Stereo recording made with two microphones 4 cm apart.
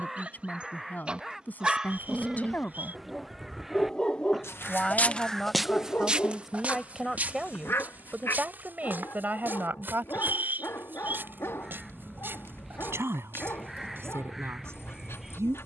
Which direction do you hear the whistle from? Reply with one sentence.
You can hear the whistle on the right.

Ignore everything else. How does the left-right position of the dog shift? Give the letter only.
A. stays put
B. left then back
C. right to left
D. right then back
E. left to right
C.